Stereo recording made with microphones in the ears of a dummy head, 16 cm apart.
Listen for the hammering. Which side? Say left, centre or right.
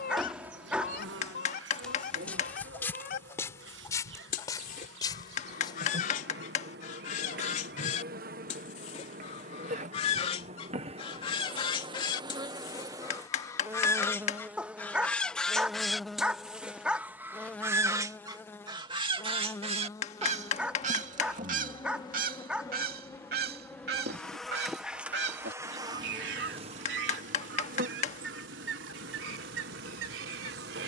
left.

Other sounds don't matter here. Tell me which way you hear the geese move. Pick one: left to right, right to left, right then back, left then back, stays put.
left to right.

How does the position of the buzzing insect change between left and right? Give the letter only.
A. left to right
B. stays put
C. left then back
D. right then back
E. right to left
C.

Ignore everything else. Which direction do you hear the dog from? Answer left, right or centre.
centre.